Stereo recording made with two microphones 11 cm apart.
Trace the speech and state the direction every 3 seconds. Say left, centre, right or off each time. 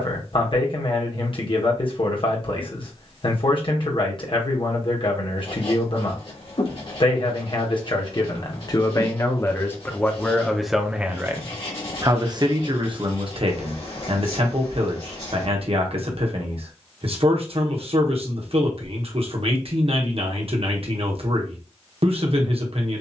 left, left, left, centre, right, right, right, right.